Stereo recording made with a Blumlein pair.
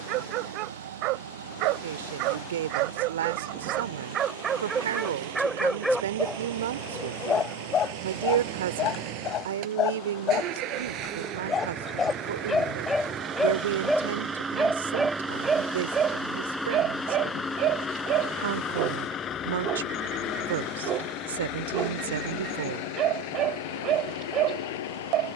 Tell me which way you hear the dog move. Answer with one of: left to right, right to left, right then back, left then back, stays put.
left then back.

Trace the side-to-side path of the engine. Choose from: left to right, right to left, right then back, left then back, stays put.
right to left.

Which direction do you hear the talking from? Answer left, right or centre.
right.